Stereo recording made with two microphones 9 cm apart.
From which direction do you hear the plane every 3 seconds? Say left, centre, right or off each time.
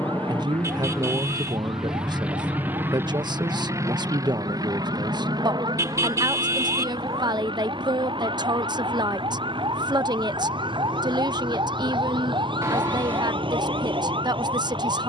centre, right, right, right, right.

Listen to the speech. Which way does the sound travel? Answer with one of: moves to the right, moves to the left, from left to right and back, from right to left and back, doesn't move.
doesn't move.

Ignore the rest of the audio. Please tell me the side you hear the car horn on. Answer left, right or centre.
right.